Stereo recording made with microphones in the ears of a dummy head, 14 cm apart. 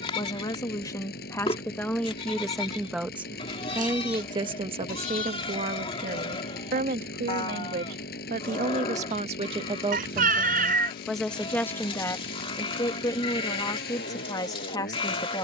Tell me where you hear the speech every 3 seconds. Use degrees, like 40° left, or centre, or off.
10° left, 30° right, 60° right, 10° right, 20° left.